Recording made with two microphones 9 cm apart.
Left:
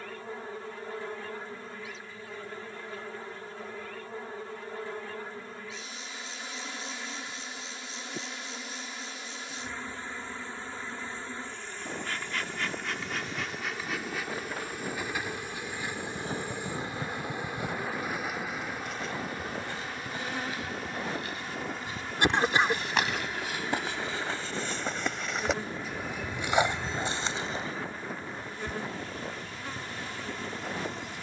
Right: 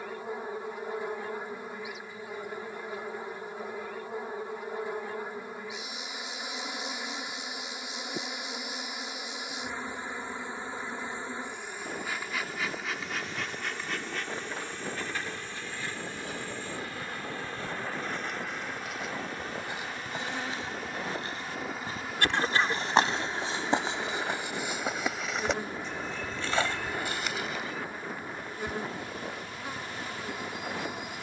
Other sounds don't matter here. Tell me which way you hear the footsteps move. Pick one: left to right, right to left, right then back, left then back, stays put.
right then back.